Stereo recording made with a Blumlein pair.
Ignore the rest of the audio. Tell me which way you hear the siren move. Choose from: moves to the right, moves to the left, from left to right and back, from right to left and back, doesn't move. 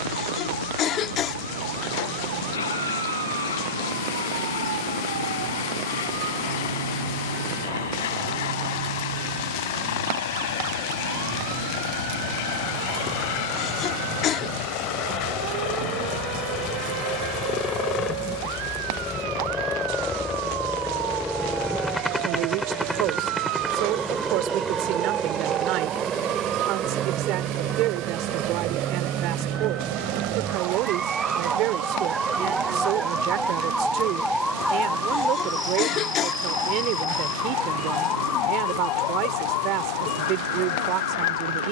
moves to the left.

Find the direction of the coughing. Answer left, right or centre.
left.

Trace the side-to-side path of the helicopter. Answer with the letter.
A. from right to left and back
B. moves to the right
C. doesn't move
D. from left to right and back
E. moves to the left
B.